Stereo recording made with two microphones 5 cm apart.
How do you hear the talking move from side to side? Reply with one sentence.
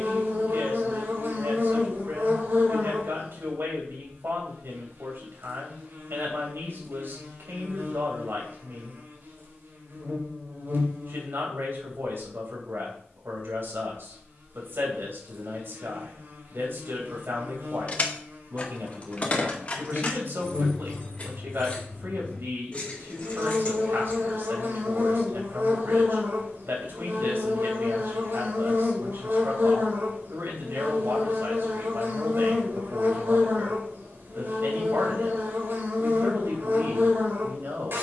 You can hear the talking stay in one place.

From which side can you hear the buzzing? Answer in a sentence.
You can hear the buzzing on the right.